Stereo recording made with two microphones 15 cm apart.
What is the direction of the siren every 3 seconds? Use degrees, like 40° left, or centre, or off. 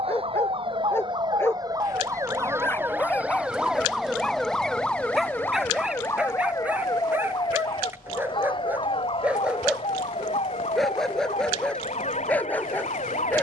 30° right, centre, 30° left, 40° left, 50° left.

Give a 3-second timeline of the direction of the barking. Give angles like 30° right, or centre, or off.
10° left, centre, 10° right, centre, 10° left.